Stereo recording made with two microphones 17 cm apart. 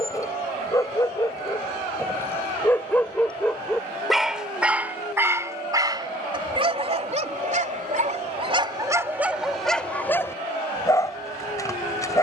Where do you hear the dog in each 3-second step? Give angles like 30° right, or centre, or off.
20° left, 10° right, 40° right, 10° left.